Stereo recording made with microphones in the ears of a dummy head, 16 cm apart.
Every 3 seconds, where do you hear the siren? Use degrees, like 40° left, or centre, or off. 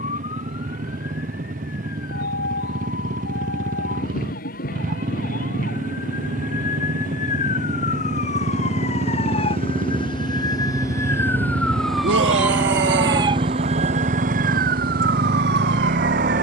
60° left, 50° left, 40° left, 20° left, 30° right, 70° right.